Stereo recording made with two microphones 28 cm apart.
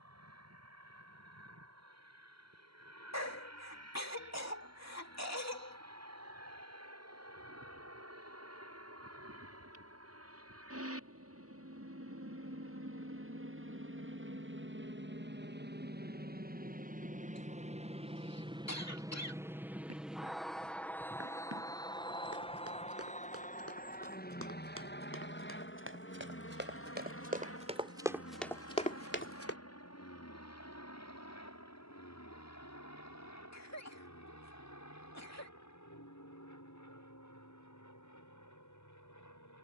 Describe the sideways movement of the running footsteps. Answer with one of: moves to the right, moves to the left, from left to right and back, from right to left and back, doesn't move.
moves to the left.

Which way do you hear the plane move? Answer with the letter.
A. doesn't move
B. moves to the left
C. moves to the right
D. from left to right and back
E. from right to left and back
B.